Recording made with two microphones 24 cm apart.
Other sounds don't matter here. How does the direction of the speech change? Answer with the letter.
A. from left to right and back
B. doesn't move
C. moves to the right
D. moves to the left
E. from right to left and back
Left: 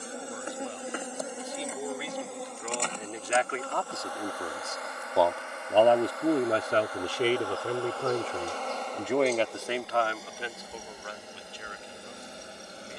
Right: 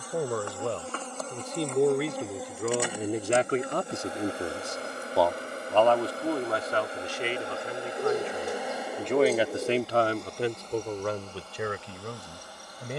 E.